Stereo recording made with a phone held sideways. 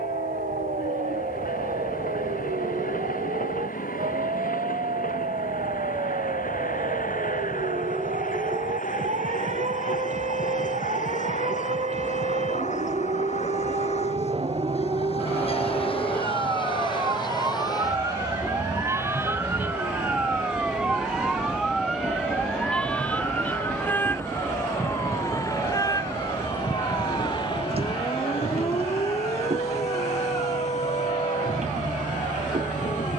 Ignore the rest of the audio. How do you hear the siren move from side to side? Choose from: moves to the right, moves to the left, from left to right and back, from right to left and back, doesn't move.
moves to the left.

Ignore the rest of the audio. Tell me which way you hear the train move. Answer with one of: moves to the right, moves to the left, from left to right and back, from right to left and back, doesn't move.
moves to the right.